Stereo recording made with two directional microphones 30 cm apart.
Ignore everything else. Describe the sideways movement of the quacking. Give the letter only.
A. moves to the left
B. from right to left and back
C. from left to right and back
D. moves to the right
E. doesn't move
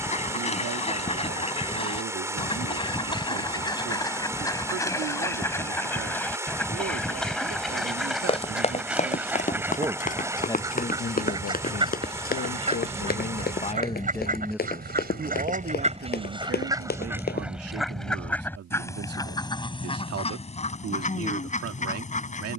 C.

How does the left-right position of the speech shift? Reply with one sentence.
In this clip you hear the speech go left and come back.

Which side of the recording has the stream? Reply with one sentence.
In this clip you hear the stream in the centre.